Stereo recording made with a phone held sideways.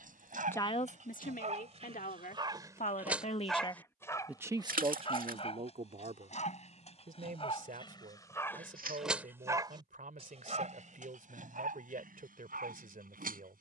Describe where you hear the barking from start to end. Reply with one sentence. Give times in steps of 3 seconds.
You can hear the barking on the right from 0 s, on the left from 3 s and on the right from 9 s.